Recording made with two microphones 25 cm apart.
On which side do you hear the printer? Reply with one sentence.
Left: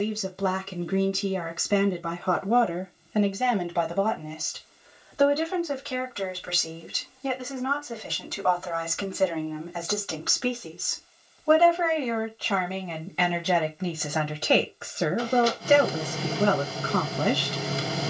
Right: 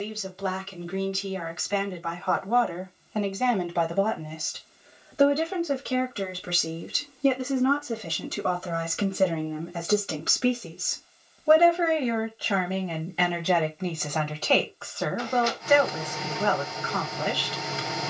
You can hear the printer on the left.